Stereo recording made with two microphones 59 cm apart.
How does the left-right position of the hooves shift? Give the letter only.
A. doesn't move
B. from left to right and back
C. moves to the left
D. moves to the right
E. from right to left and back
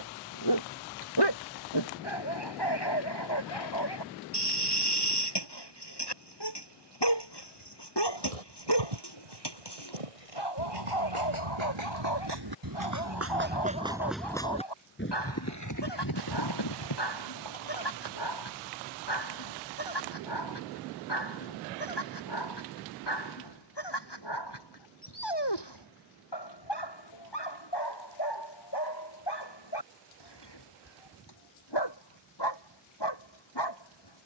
C.